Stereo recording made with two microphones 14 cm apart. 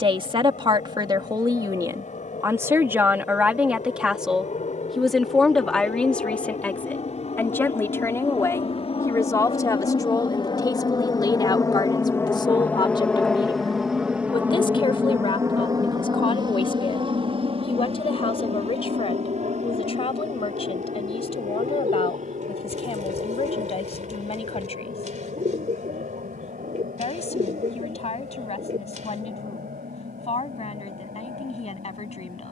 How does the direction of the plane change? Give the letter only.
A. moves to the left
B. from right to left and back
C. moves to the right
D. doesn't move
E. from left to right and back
C.